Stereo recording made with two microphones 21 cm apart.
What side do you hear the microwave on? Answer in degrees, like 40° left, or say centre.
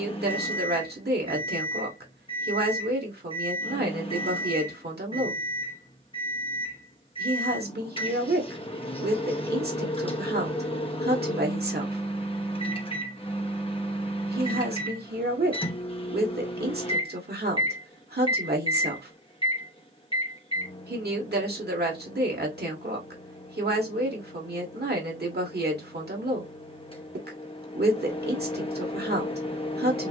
30° left.